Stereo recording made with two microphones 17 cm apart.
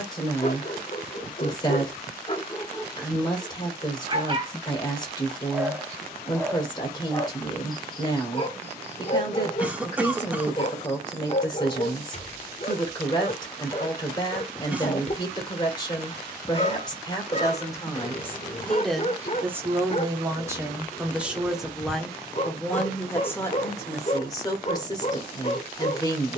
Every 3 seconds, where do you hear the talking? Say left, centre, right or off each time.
left, left, left, left, left, left, centre, centre, left.